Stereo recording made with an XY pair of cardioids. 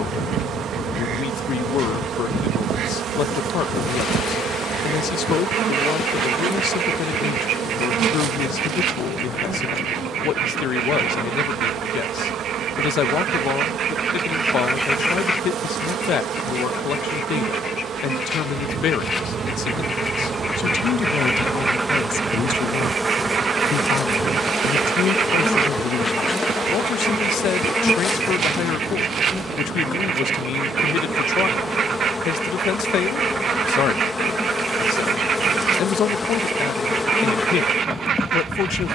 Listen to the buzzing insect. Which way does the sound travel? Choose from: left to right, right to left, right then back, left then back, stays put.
right to left.